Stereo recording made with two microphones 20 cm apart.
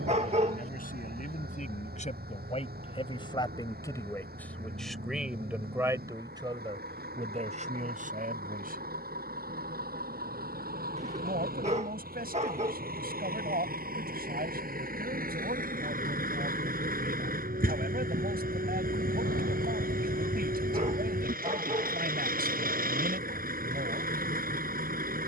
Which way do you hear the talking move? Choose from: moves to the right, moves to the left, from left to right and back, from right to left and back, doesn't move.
moves to the right.